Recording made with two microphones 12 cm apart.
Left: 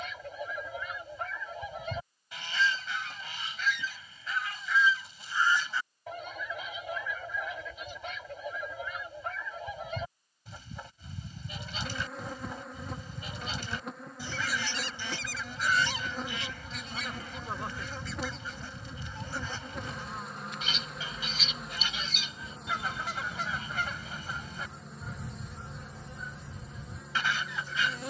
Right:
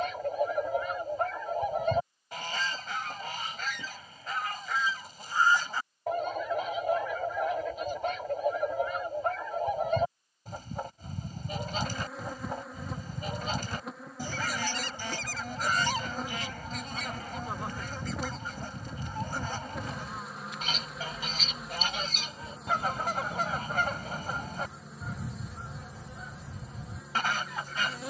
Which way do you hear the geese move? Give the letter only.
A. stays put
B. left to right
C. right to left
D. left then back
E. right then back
A.